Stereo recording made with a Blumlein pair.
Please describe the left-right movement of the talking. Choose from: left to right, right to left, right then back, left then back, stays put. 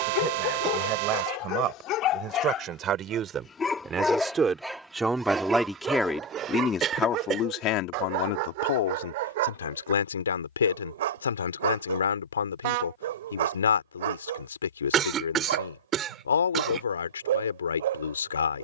right to left.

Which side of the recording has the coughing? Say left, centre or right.
right.